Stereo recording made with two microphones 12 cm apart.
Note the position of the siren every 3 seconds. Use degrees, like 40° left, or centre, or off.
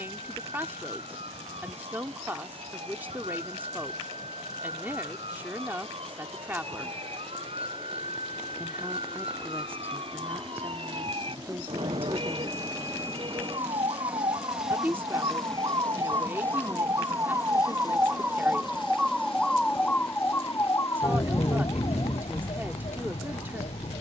60° right, 60° right, 60° right, 50° right, 50° right, 30° right, centre, 50° left.